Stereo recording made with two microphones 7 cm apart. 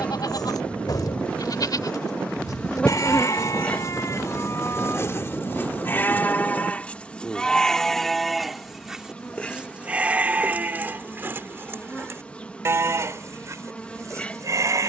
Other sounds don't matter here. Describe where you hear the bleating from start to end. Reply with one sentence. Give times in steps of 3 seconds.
In this clip you hear the bleating on the left from 0 s, in the centre from 6 s and on the right from 9 s.